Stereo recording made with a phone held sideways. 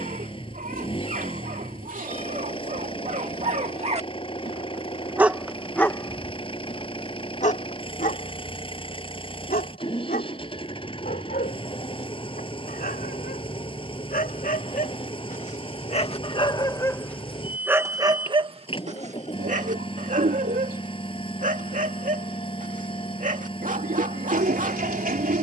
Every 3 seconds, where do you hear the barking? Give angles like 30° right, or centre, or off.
70° right, 30° right, 50° left, 70° left, 70° left, 20° left, 50° right, 60° right, 60° right.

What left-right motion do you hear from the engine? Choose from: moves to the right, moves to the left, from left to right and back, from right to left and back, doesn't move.
doesn't move.